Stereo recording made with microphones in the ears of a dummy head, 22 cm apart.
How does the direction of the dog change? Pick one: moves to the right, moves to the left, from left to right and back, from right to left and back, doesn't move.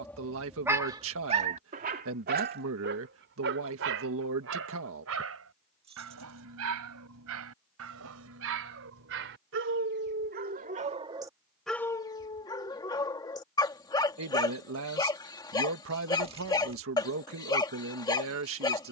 from left to right and back.